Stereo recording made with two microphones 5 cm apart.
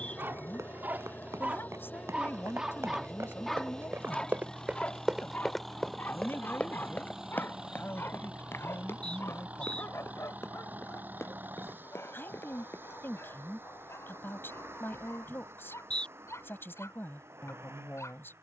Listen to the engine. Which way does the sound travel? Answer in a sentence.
In this clip you hear the engine go from the left side to the right.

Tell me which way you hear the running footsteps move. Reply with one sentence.
You can hear the running footsteps move to the left.